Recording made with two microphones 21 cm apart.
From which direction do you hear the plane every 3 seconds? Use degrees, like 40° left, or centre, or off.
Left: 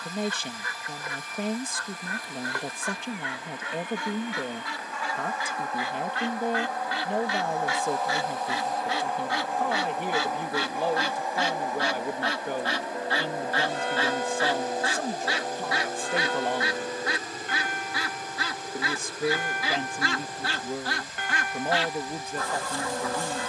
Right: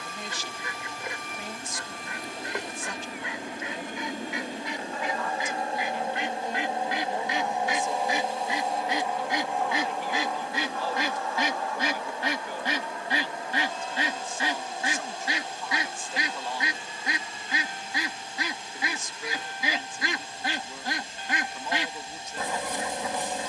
60° right, 40° right, 20° right, 10° left, 30° left, 40° left, 50° left, 50° left.